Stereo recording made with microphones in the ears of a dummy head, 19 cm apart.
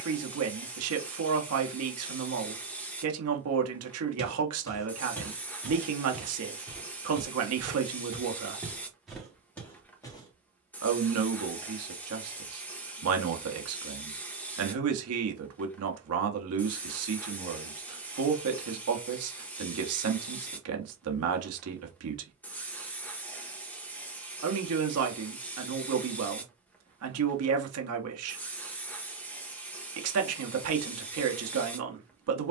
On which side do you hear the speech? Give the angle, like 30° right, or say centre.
80° right.